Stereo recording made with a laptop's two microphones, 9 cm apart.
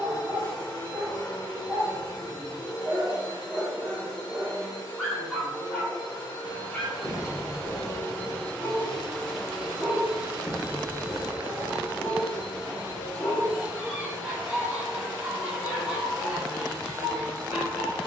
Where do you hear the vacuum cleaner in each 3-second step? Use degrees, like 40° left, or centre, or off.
50° left, 50° left, 30° left, 10° right, 30° right, 30° right.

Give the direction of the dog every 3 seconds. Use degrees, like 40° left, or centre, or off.
20° right, 10° right, 30° left, 40° left, 10° left, 10° right.